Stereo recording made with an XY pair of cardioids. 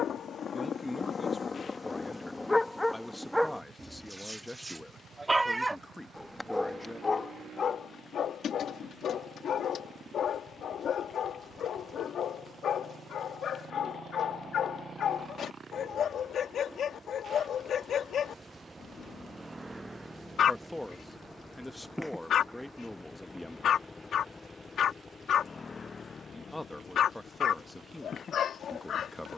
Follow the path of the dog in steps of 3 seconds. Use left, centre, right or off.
left, centre, left, left, left, left, left, left, left, left.